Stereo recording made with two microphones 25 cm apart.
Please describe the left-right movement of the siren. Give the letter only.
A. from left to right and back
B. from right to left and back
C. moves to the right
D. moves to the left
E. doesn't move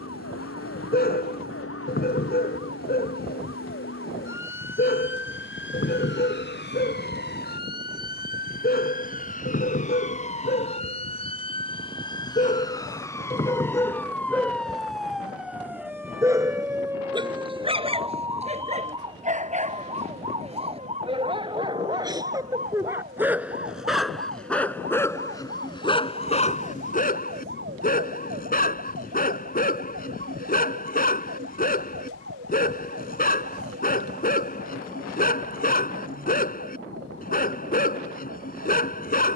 C.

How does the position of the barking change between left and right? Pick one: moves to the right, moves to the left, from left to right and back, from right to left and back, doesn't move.
from left to right and back.